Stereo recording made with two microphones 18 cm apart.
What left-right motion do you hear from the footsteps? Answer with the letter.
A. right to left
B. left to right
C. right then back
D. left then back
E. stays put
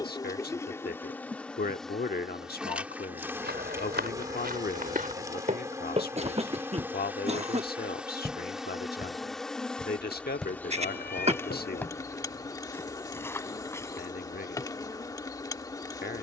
A.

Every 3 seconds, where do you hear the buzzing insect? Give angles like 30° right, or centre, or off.
10° left, 20° right, 10° right, 10° left, 20° left, 20° left.